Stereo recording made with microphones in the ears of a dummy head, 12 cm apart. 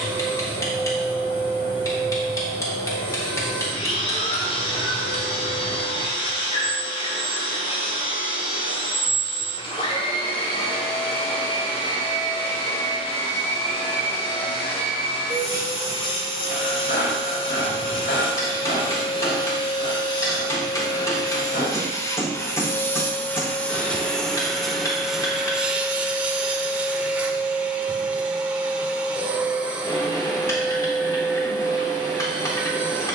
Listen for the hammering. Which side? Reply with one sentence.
In this clip you hear the hammering on the left.